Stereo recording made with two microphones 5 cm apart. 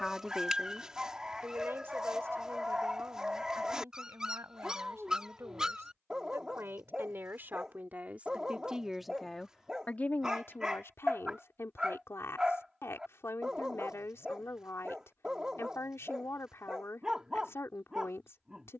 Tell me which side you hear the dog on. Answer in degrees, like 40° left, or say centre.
10° right.